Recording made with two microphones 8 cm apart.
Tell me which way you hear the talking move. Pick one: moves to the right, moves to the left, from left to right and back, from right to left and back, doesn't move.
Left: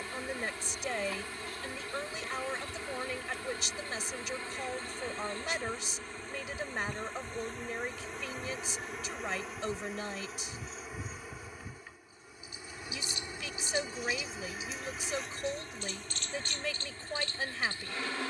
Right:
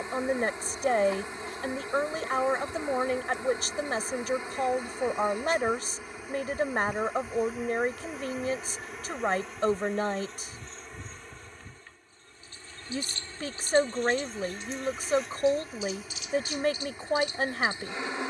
doesn't move.